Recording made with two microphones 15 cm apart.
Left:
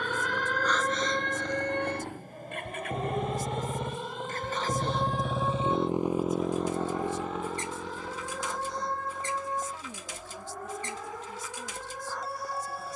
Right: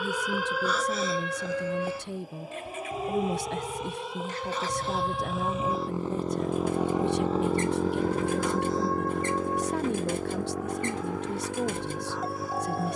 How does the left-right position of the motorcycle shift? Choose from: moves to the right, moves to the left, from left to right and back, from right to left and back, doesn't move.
moves to the right.